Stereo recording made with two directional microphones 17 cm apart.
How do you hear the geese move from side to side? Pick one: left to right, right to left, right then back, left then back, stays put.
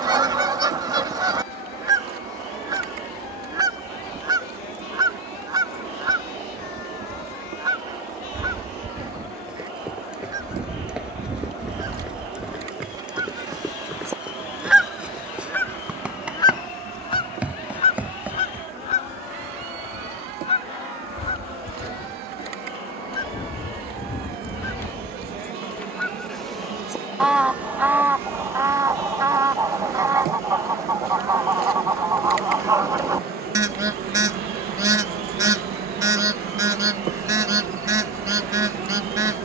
left then back.